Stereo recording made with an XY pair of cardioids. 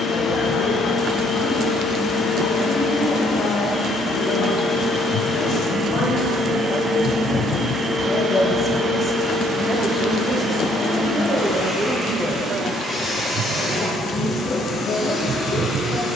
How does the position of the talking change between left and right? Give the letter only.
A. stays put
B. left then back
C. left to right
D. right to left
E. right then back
E.